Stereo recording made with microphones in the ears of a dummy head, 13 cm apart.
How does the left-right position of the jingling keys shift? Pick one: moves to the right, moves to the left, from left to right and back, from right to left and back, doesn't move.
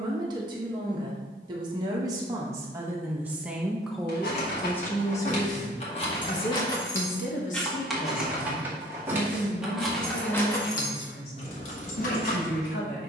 from left to right and back.